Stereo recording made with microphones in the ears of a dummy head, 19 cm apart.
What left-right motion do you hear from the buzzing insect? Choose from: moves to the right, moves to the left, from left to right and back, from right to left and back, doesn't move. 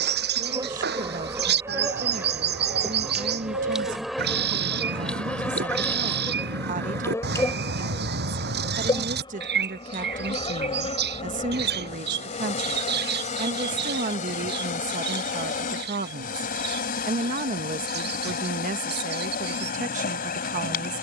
moves to the left.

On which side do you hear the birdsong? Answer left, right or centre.
right.